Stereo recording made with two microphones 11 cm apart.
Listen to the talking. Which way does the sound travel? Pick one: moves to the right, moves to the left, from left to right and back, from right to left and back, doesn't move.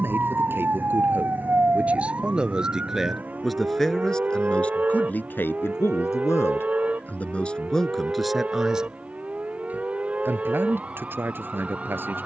from right to left and back.